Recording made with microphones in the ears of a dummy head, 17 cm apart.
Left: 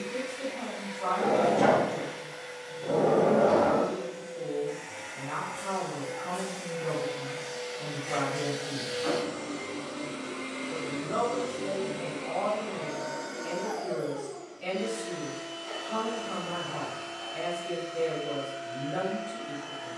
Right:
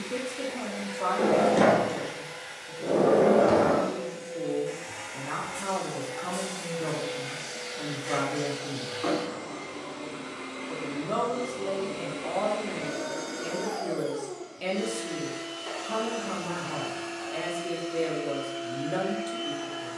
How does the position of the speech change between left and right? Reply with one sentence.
You can hear the speech stay in one place.